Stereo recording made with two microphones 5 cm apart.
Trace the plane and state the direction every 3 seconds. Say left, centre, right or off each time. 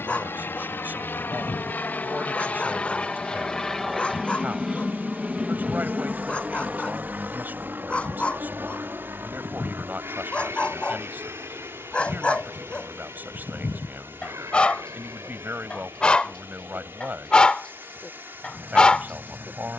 left, centre, right, right, right, right, right.